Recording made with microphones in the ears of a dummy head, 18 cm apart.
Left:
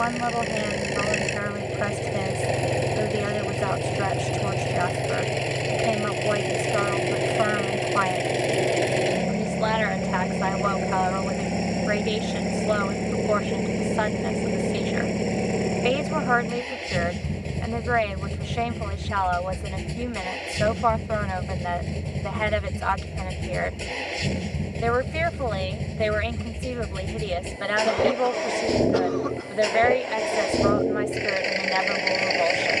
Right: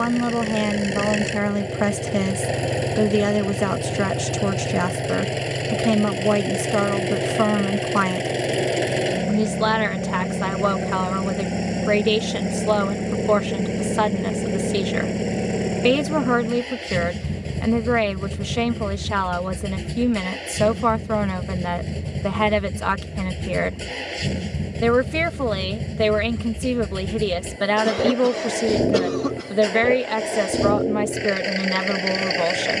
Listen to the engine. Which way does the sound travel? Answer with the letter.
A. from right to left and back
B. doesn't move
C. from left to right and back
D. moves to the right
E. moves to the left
B.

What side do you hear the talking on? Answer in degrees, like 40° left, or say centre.
60° right.